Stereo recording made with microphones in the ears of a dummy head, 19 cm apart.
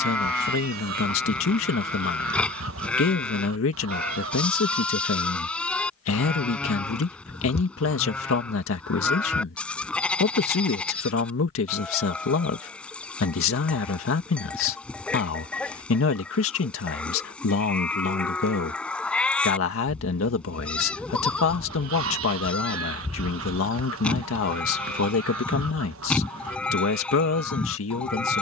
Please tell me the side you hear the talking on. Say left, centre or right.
left.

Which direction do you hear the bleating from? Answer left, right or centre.
centre.